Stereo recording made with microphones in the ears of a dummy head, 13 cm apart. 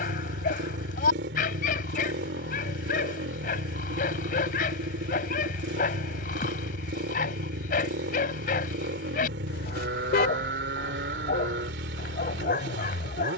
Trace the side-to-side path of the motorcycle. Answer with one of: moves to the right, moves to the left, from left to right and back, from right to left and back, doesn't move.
doesn't move.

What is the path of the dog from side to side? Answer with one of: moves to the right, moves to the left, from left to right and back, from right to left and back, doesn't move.
doesn't move.